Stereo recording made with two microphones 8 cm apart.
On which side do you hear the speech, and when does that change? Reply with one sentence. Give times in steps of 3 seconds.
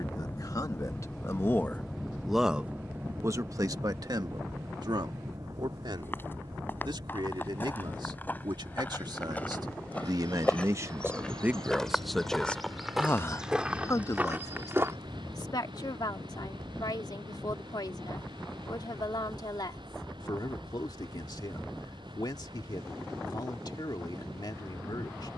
You can hear the speech on the left from 0 s, on the right from 3 s and on the left from 12 s.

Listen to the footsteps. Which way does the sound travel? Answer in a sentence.
In this clip you hear the footsteps move to the right.